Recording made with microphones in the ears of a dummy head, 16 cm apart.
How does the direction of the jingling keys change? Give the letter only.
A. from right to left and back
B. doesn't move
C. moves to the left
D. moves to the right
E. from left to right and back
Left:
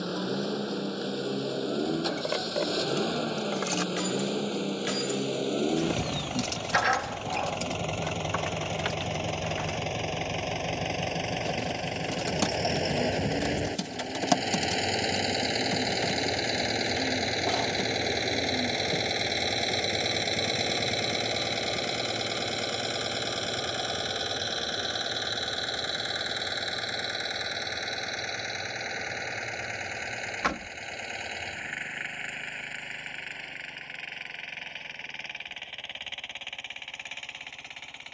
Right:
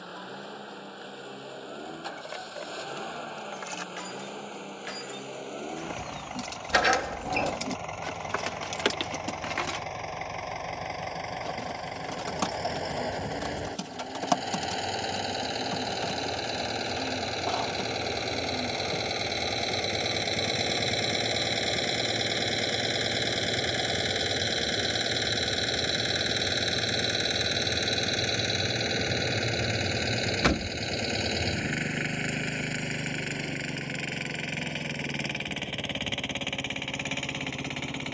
D.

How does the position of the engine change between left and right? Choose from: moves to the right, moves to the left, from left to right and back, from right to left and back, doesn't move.
moves to the right.